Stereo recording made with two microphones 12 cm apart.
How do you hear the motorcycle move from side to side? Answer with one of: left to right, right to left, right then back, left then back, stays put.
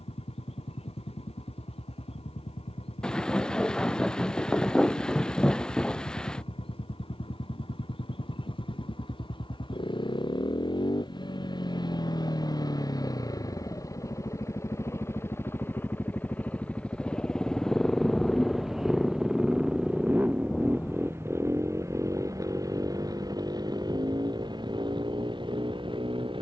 left to right.